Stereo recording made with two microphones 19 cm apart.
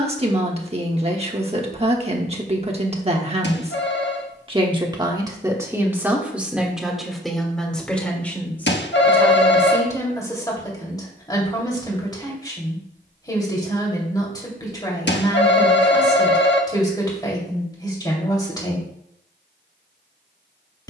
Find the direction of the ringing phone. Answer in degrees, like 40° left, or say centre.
70° left.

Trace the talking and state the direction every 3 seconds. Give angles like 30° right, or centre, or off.
30° right, 20° right, centre, 20° left, 20° left, 20° left, 20° left.